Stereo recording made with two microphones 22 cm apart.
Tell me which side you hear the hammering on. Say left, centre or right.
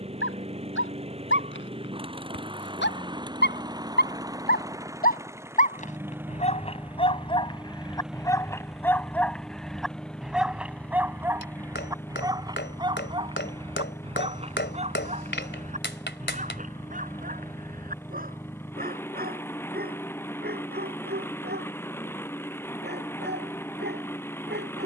left.